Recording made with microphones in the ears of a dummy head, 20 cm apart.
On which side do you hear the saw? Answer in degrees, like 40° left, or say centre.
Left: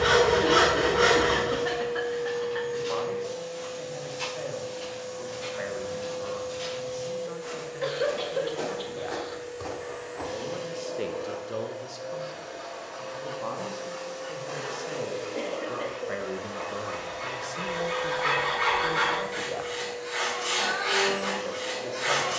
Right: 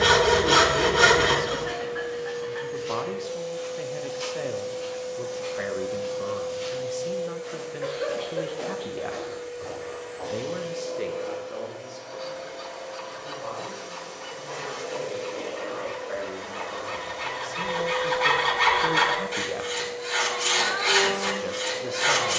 60° right.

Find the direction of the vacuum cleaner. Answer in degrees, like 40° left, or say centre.
centre.